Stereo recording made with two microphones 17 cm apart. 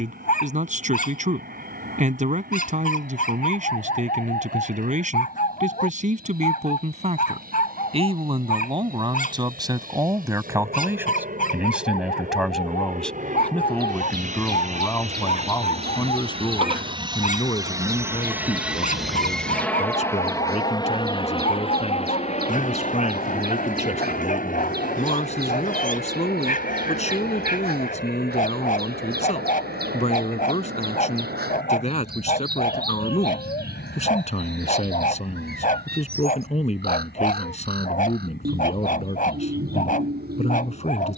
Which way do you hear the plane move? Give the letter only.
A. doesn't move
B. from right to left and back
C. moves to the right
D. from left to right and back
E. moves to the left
E.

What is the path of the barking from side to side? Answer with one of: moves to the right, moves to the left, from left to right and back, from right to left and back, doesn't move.
doesn't move.